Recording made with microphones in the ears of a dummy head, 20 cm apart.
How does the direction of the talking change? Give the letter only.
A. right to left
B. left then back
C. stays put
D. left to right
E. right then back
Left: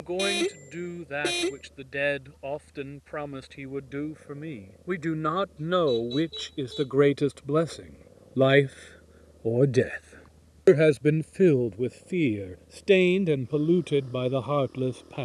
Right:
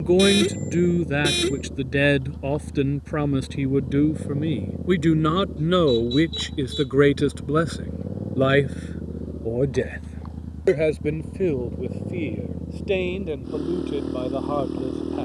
A.